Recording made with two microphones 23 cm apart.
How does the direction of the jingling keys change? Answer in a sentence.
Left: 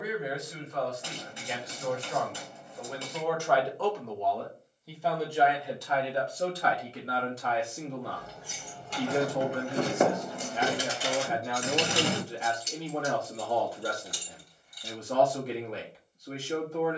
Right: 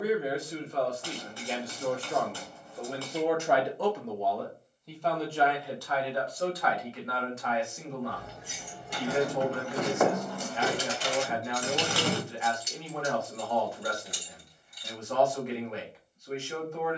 You can hear the jingling keys move from right to left and back again.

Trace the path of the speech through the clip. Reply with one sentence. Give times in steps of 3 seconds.
You can hear the speech on the right from 0 s, in the centre from 3 s and on the left from 6 s.